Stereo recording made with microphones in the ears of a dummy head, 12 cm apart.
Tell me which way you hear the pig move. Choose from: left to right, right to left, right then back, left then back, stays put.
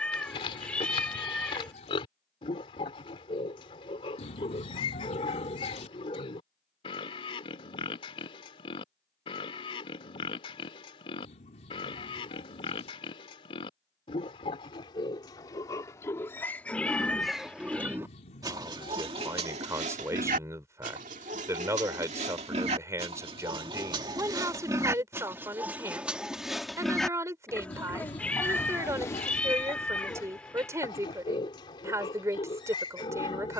right then back.